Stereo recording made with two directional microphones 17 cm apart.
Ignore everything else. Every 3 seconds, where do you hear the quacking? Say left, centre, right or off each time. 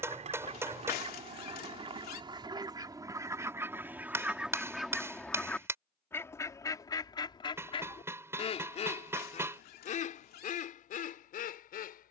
right, centre, left, left.